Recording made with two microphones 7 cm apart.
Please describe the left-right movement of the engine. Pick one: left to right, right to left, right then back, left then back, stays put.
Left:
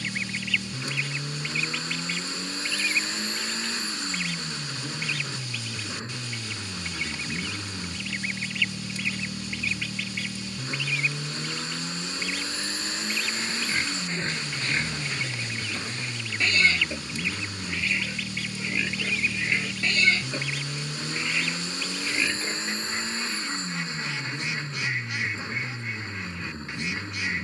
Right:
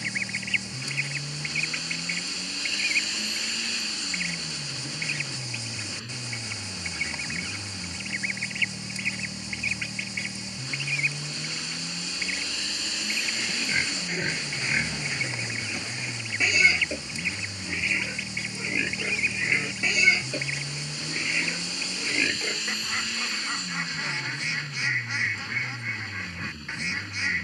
stays put.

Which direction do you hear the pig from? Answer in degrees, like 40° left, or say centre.
10° right.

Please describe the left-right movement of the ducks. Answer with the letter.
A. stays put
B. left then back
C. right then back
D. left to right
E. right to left
A.